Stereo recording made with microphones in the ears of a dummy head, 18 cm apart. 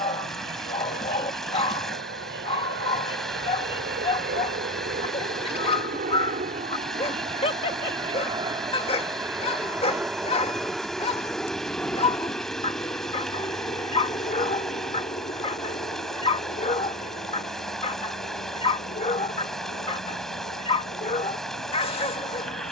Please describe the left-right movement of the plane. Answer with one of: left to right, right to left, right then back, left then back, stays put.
right to left.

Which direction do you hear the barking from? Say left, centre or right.
left.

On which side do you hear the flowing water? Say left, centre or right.
centre.